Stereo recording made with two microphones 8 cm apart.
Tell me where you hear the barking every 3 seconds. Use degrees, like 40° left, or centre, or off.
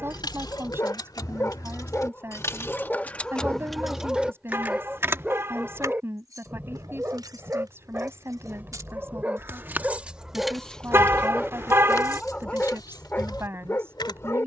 30° left, 10° right, 30° right, 10° right, 20° left.